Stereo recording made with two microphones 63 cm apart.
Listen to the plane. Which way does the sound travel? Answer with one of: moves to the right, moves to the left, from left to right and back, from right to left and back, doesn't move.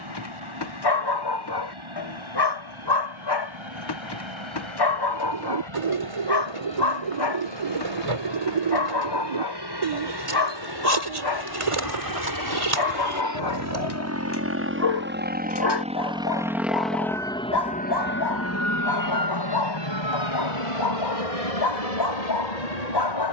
moves to the left.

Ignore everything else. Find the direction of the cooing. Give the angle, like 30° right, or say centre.
50° right.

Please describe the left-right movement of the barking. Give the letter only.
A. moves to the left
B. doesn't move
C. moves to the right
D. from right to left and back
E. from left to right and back
B.